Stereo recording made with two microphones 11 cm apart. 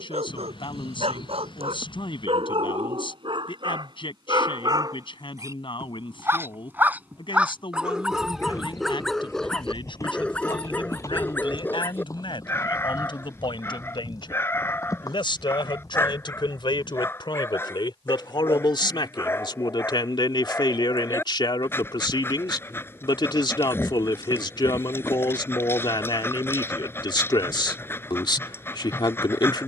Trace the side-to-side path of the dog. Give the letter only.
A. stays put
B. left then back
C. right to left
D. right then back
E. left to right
C.